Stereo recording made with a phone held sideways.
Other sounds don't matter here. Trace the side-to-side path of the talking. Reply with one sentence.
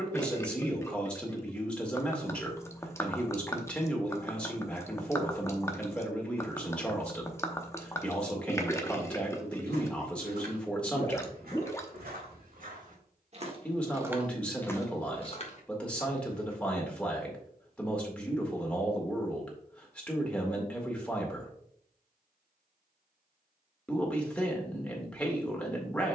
You can hear the talking stay in one place.